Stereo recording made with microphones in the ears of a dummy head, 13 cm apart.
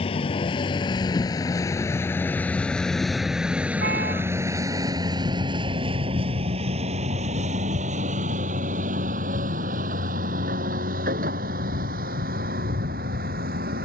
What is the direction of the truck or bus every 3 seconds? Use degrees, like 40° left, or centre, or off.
20° left, 20° right, 50° right, 60° right, 70° right.